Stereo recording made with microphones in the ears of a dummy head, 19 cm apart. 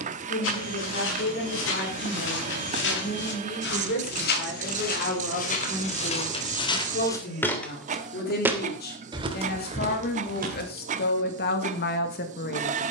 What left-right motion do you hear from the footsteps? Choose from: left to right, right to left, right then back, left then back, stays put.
left to right.